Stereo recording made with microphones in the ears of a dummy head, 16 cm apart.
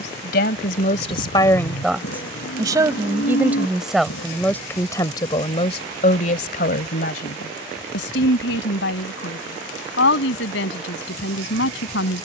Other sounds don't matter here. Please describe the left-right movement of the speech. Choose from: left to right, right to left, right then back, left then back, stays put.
right then back.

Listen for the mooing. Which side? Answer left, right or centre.
left.